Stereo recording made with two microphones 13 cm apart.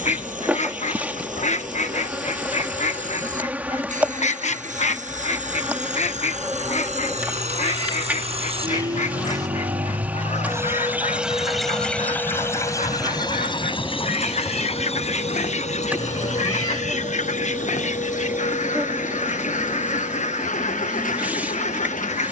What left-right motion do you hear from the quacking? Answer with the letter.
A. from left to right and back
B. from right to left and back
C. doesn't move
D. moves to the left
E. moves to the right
C.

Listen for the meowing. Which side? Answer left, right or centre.
left.